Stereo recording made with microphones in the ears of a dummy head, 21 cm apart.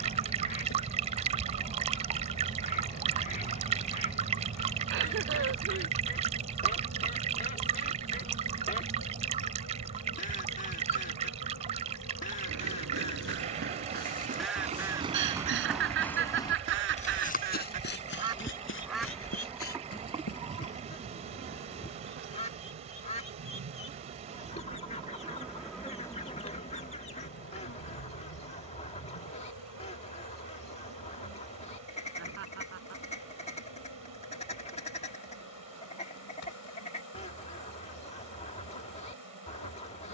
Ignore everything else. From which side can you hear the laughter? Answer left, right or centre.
right.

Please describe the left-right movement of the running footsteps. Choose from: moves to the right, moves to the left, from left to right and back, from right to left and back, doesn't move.
moves to the left.